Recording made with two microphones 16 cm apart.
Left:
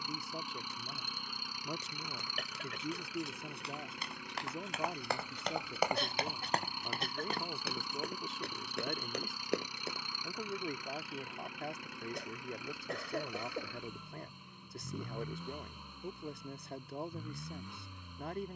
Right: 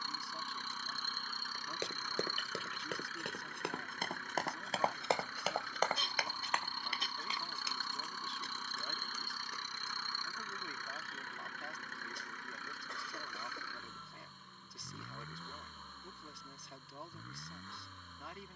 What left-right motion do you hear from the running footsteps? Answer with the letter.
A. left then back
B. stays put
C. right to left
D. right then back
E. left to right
C.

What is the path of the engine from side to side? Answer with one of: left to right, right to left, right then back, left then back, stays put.
stays put.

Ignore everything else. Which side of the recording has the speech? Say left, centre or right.
left.